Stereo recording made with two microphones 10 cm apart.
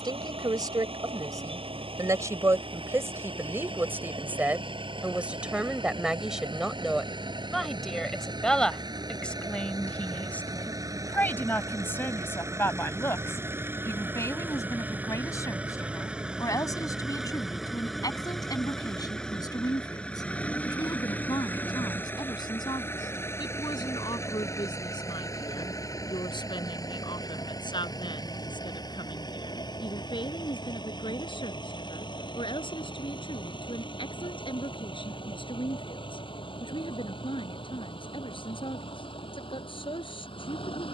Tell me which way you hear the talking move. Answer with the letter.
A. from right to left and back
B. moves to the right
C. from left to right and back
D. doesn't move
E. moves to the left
E.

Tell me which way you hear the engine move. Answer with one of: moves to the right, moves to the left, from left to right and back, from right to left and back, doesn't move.
moves to the left.